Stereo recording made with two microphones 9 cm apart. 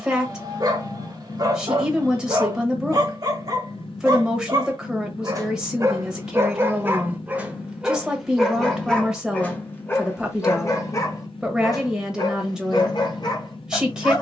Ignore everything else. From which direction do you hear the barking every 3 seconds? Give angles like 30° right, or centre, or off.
40° right, 40° right, 10° right, 30° left, 50° left.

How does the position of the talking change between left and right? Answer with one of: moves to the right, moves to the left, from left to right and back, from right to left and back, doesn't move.
doesn't move.